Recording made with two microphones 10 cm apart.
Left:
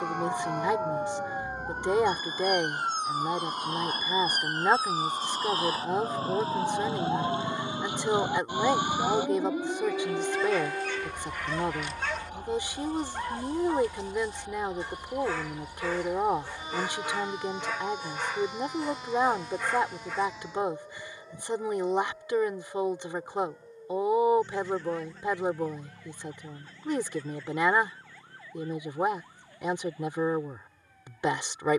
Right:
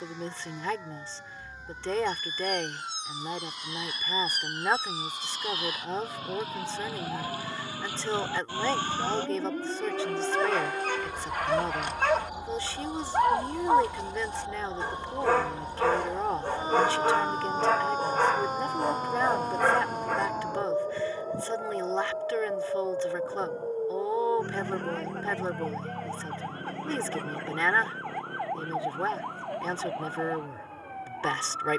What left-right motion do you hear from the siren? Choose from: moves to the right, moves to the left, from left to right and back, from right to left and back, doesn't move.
moves to the right.